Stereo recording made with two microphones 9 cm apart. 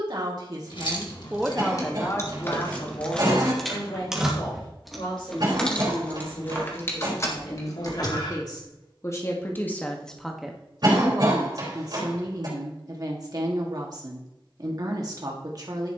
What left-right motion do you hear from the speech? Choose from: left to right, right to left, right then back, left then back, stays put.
left then back.